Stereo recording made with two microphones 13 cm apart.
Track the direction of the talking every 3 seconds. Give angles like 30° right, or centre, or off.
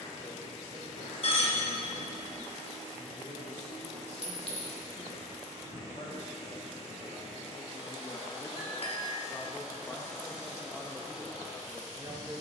70° left, 60° left, 50° left, centre.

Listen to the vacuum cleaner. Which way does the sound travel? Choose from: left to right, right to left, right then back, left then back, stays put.
stays put.